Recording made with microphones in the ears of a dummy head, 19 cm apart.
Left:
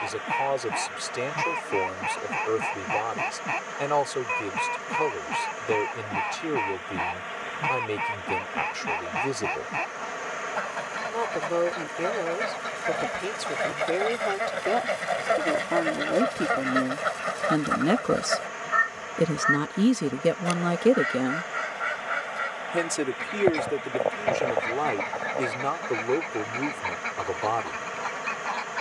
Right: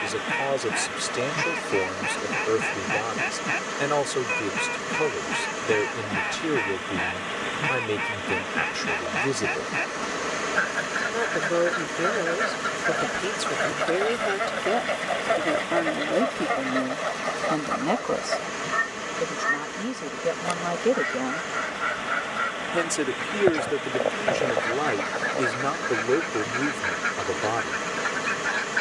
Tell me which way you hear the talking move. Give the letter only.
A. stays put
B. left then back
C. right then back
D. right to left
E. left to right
B.